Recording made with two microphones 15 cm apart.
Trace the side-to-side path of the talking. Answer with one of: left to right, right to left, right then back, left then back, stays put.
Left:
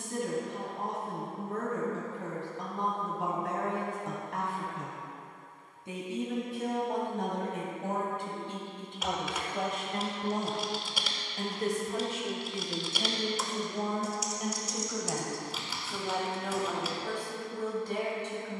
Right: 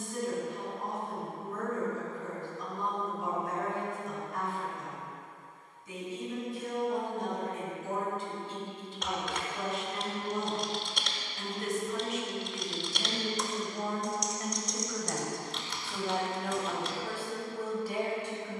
left to right.